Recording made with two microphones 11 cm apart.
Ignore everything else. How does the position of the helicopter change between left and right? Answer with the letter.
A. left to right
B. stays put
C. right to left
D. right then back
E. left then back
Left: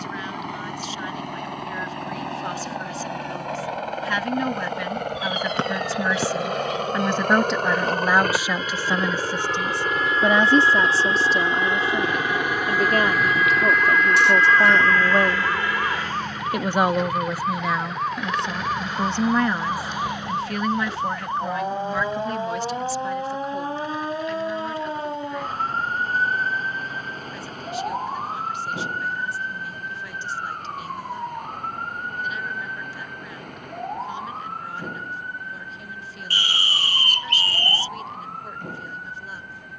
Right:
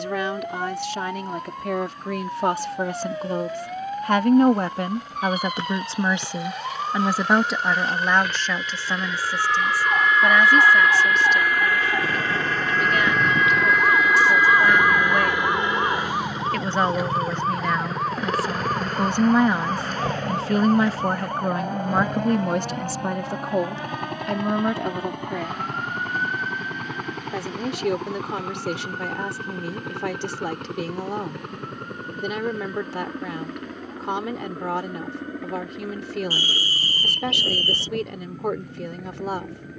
A.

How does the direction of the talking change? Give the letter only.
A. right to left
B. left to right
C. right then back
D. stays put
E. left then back
E.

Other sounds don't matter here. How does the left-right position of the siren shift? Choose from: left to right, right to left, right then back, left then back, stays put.
right to left.